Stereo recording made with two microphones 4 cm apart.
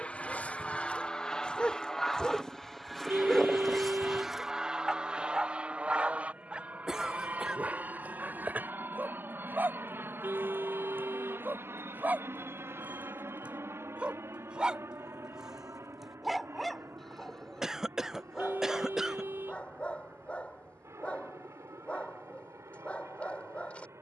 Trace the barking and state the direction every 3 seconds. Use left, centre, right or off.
left, centre, right, right, right, centre, left, left.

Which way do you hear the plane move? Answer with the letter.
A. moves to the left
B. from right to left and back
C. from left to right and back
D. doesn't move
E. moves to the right
E.